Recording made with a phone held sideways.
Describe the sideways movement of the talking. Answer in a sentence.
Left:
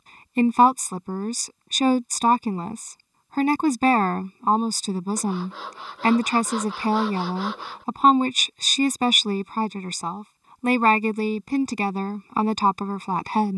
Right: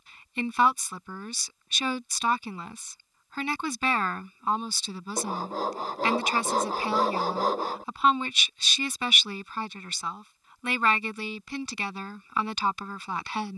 You can hear the talking stay in one place.